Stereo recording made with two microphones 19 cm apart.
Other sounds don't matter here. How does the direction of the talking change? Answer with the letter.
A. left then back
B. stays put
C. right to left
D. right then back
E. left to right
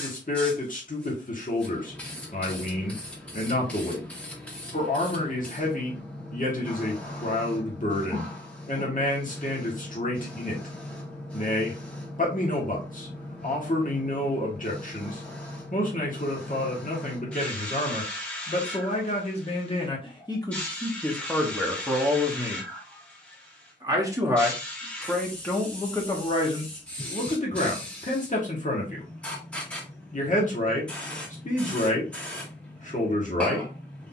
D.